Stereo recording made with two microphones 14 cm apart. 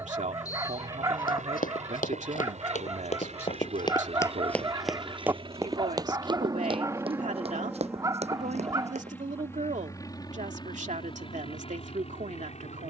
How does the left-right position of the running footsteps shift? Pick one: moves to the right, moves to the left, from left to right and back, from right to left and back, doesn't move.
moves to the right.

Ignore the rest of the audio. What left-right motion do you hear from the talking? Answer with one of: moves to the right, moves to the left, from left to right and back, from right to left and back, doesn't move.
doesn't move.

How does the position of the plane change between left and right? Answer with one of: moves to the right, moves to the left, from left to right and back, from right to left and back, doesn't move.
moves to the left.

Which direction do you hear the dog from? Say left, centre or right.
right.